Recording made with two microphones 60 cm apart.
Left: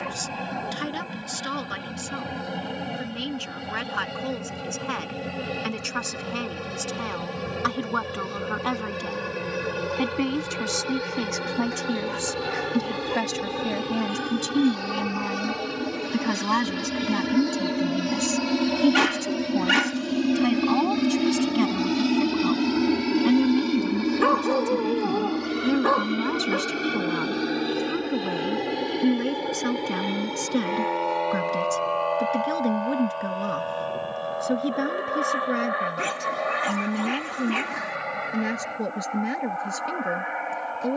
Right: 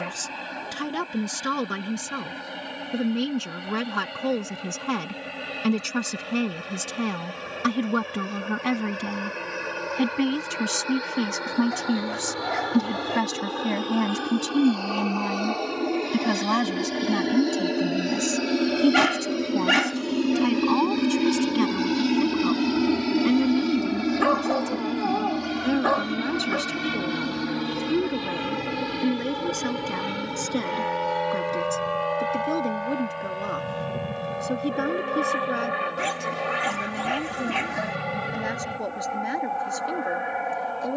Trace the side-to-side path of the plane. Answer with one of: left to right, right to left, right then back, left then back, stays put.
left to right.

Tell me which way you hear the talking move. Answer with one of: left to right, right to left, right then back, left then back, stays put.
right to left.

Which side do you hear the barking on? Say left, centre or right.
centre.